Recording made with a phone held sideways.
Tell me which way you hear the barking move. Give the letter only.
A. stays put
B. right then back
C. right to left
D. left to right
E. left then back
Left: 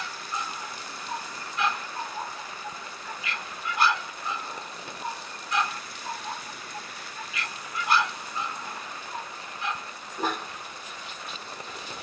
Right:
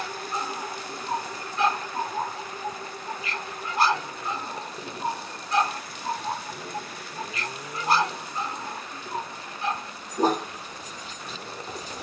A.